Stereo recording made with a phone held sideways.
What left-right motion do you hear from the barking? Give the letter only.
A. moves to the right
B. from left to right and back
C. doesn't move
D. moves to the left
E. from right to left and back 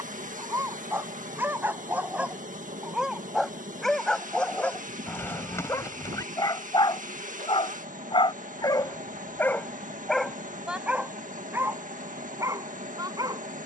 E.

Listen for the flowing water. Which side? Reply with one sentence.
You can hear the flowing water on the right.